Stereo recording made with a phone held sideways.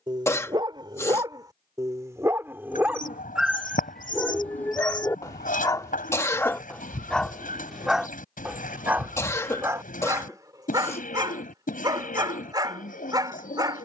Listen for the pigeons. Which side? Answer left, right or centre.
left.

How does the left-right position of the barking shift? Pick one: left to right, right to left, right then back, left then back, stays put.
left then back.